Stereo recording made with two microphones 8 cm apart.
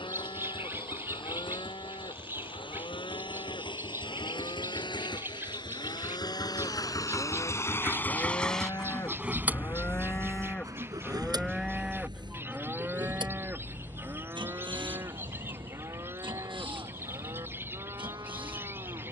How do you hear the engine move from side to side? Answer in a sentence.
You can hear the engine go from the left side to the right.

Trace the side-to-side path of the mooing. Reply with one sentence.
In this clip you hear the mooing move from left to right.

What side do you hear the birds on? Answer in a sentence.
You can hear the birds on the right.